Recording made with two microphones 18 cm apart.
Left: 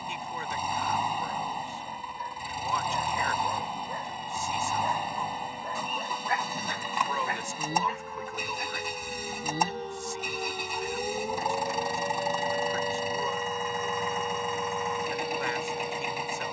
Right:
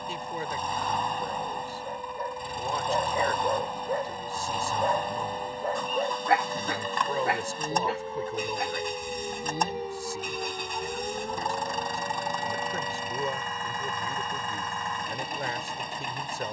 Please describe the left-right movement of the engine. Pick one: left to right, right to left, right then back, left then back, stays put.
stays put.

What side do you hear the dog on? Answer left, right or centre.
right.